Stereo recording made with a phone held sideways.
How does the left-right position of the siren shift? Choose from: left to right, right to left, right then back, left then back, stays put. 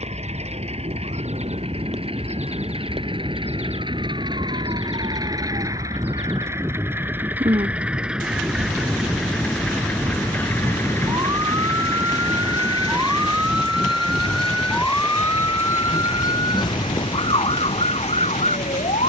right to left.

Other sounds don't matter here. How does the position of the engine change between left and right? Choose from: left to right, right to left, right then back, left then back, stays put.
right to left.